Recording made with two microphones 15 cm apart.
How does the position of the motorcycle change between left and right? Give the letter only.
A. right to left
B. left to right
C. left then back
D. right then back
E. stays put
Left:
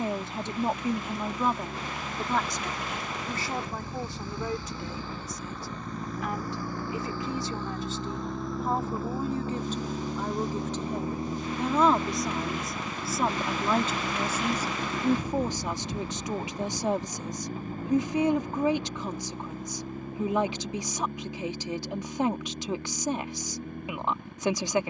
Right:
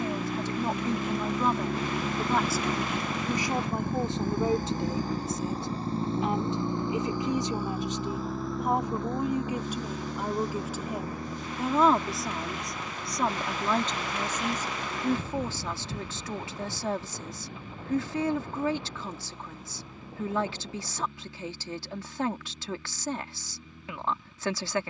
A.